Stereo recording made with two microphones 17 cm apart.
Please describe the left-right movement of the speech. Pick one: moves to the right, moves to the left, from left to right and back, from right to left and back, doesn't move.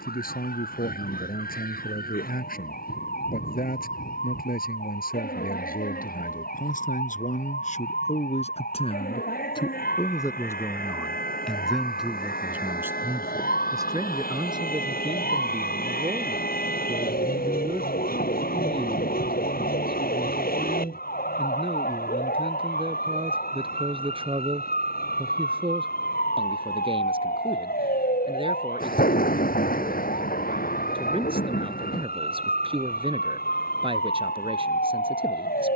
moves to the right.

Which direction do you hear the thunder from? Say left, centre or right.
left.